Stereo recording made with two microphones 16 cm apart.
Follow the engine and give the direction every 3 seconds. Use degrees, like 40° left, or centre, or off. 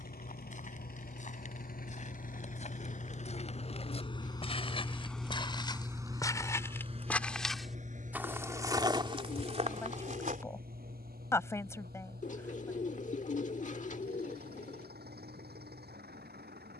60° left, 20° left, 40° right, 60° right, 70° right, 70° right.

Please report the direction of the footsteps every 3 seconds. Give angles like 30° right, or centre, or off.
50° left, 30° left, centre, 40° right, off, off.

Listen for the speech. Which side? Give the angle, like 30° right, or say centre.
20° left.